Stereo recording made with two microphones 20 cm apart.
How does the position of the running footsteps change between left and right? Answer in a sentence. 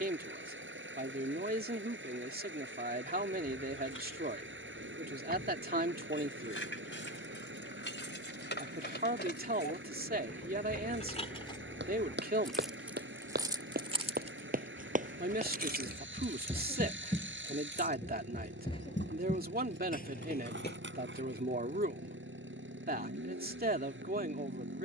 You can hear the running footsteps go from the right side to the left.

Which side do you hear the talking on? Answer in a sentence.
In this clip you hear the talking on the right.